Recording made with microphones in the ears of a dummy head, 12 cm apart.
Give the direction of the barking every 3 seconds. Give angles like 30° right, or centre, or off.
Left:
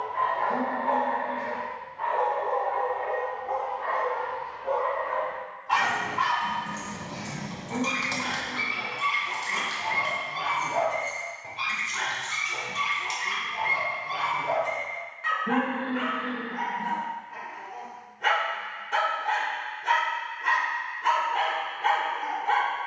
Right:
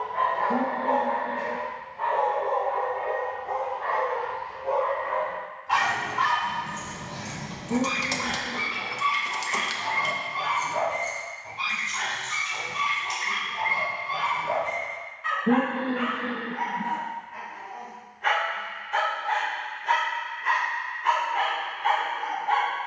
30° right, 10° right, 20° left, 60° left, 70° left, 70° left, 70° left, 70° left.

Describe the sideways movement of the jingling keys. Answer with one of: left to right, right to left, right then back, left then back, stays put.
right then back.